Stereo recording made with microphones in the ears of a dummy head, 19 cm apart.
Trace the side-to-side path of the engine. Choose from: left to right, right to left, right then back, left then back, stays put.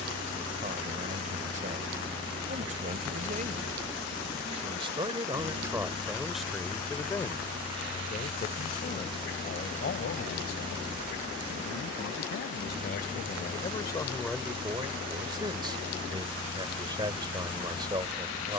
stays put.